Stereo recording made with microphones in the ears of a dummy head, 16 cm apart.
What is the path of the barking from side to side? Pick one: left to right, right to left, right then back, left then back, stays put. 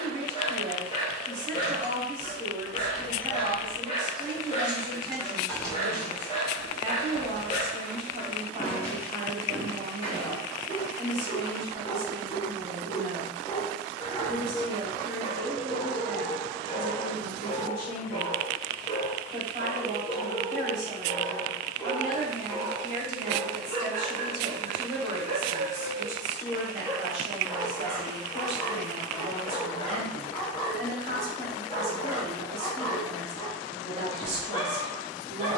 right then back.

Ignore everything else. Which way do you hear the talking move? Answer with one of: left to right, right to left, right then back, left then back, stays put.
stays put.